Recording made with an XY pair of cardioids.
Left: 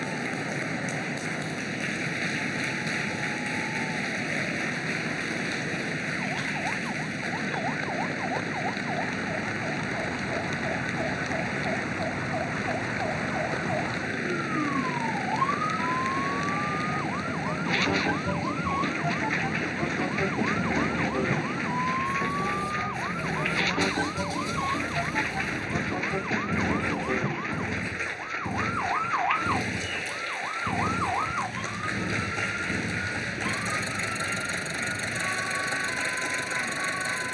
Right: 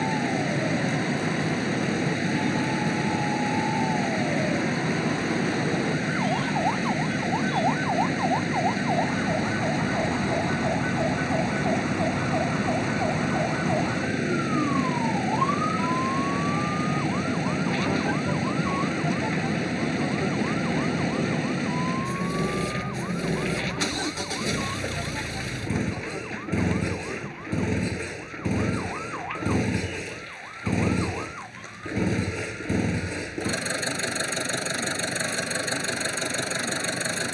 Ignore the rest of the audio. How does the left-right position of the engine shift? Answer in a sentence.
You can hear the engine stay put.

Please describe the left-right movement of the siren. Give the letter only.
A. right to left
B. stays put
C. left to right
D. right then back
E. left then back
A.